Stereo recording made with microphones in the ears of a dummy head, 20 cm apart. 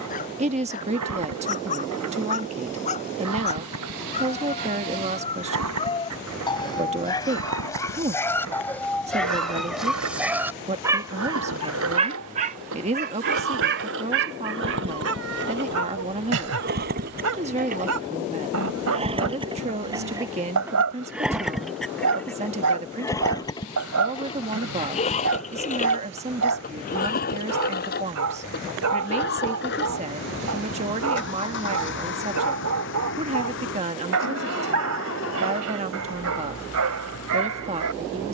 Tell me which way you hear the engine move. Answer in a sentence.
In this clip you hear the engine travel towards the left.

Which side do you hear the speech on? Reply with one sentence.
In this clip you hear the speech on the right.